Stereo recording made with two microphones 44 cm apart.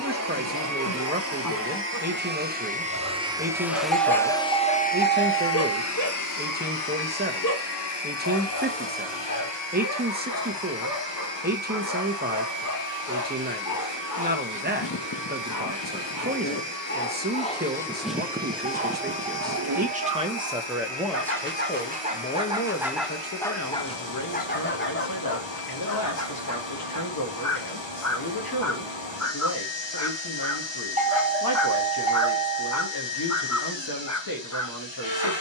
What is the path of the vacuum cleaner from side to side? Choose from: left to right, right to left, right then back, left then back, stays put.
right to left.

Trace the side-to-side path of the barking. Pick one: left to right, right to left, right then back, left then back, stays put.
right then back.